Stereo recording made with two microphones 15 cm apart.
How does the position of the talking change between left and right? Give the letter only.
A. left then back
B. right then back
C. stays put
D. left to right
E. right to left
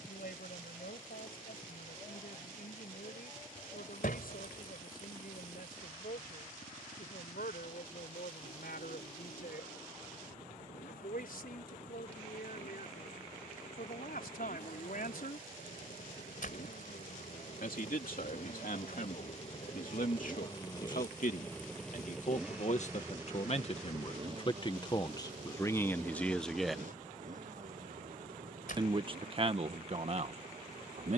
D.